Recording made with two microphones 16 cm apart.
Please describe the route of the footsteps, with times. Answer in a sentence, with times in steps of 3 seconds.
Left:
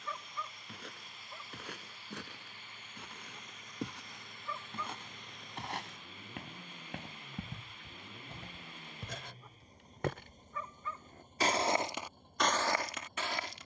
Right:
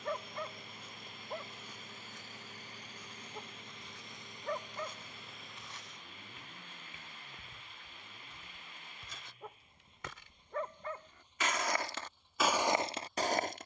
In this clip you hear the footsteps on the left from 0 s and on the right from 12 s.